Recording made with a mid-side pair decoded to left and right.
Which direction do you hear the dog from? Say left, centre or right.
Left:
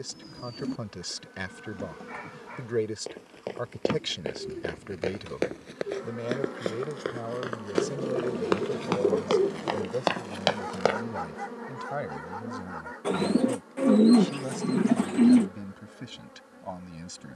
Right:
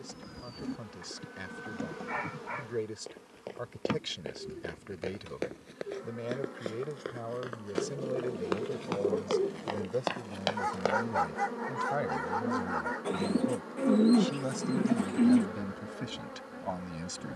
right.